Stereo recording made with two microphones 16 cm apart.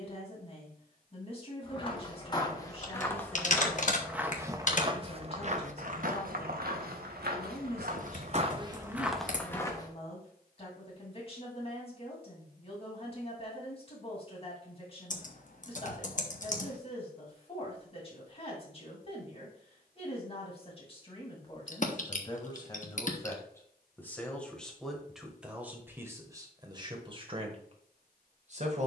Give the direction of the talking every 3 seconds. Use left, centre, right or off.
left, left, left, left, left, left, left, left, centre, right.